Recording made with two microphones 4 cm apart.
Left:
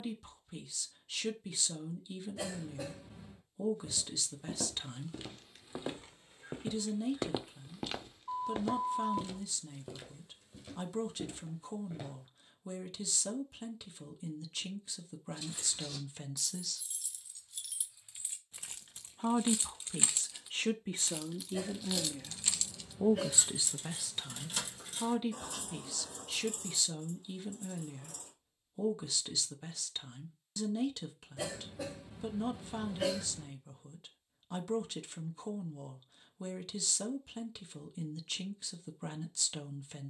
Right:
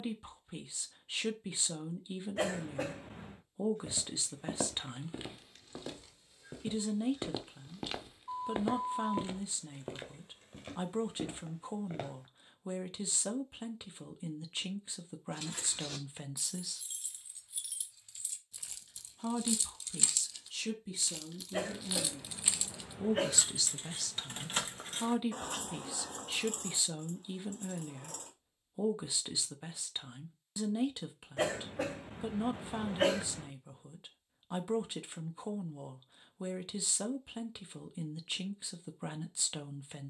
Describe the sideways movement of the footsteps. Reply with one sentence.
You can hear the footsteps go left and come back.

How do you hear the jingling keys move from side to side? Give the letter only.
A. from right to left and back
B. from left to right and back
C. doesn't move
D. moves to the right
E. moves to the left
A.